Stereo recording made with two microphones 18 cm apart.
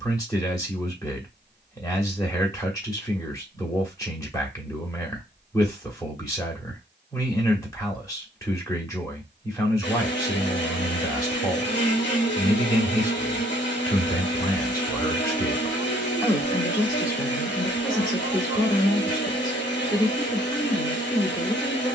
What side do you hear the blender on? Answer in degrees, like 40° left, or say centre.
70° left.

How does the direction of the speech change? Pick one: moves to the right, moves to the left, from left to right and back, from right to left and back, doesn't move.
doesn't move.